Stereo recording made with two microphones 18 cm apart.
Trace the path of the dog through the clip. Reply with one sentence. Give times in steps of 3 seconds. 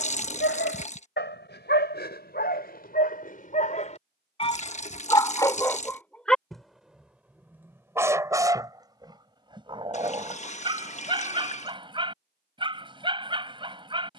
You can hear the dog on the left from 0 s, in the centre from 6 s and on the right from 9 s.